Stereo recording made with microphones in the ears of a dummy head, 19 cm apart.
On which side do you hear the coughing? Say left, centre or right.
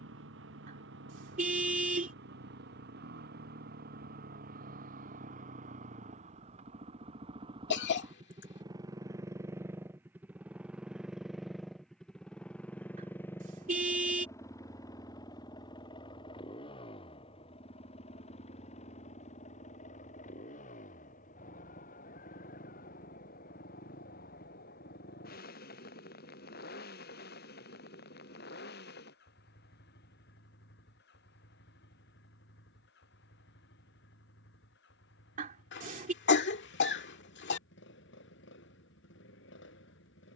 left.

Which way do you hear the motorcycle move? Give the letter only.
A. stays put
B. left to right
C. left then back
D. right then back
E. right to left
E.